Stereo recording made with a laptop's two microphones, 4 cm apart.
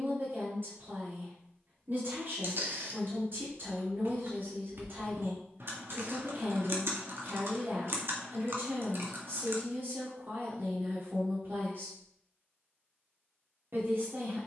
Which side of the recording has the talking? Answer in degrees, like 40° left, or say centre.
60° right.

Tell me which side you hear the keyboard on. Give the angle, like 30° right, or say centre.
60° right.